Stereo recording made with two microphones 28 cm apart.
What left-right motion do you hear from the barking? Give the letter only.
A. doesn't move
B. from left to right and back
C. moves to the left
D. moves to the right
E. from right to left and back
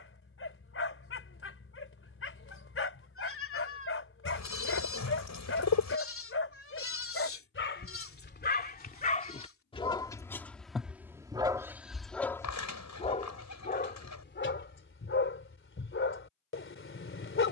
B.